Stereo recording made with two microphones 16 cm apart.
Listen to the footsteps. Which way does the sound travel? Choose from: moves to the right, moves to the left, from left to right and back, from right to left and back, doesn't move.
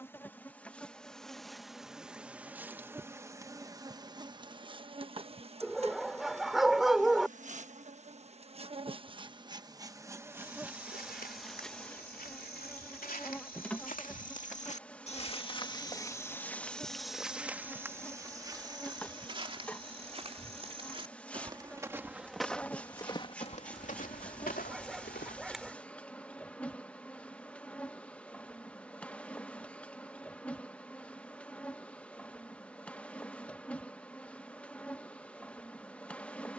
from left to right and back.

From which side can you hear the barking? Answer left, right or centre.
centre.